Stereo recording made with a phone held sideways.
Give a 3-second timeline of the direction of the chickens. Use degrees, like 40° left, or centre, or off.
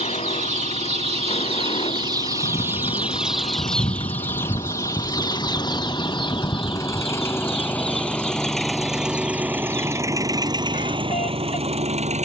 40° right, 20° left, 50° left, 60° left.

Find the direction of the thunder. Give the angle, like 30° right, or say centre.
40° left.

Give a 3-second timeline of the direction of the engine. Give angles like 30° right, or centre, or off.
50° left, 40° left, 10° left, 30° right.